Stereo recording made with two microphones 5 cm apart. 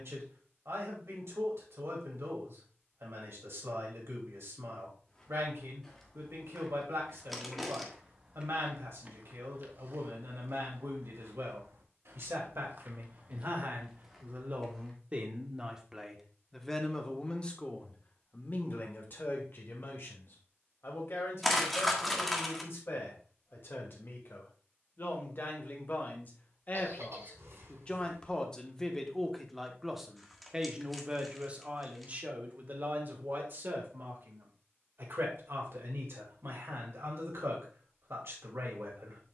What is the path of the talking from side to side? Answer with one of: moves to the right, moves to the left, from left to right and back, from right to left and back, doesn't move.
from right to left and back.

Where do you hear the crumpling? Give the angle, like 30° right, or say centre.
centre.